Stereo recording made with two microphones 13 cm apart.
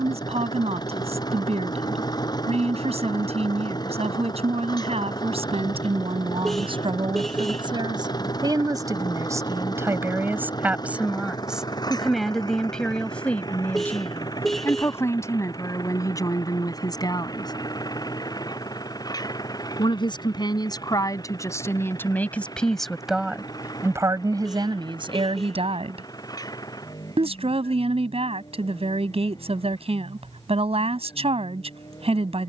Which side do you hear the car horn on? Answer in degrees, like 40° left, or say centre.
centre.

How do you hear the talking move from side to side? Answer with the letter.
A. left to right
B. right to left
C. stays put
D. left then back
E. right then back
D.